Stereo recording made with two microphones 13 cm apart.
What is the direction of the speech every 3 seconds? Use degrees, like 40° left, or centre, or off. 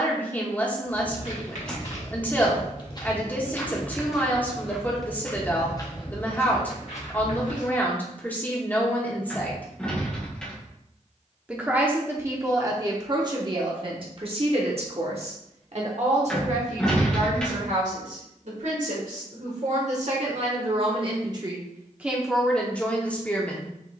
10° left, 10° left, 10° left, centre, 30° right, 60° right, 60° right, centre.